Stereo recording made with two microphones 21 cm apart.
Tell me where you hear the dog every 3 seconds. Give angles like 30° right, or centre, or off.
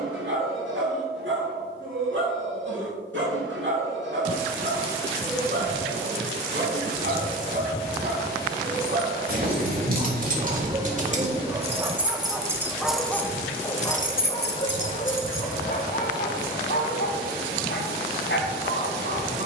70° right, 60° right, 50° right, 30° right, 10° left, 50° left, 60° left.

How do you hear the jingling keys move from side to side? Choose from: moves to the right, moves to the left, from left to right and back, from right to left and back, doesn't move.
moves to the left.